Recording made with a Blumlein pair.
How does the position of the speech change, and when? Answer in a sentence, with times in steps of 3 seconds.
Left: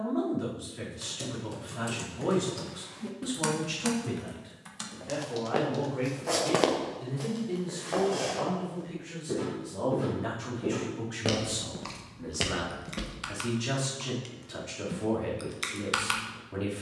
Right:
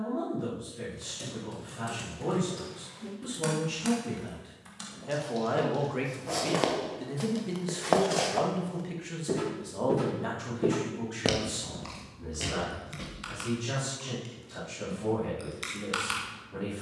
In this clip you hear the speech on the left from 0 s, in the centre from 3 s, on the right from 6 s, in the centre from 9 s and on the left from 12 s.